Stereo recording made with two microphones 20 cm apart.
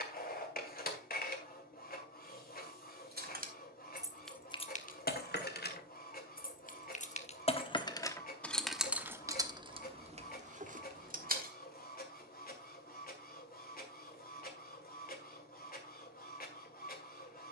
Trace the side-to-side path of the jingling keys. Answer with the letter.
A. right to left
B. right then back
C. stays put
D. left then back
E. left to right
D.